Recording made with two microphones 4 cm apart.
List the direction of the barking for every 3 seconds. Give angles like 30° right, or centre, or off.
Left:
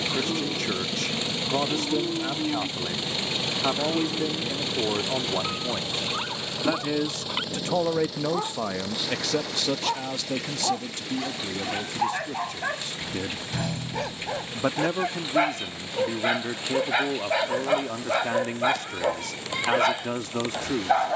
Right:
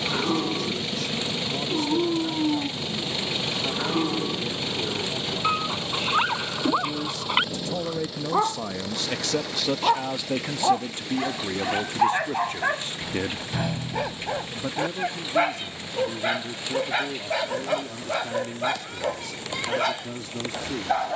50° right, 50° right, 40° right, 30° right, 20° right, centre, 10° left.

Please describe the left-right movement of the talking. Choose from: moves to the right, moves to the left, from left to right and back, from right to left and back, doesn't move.
from left to right and back.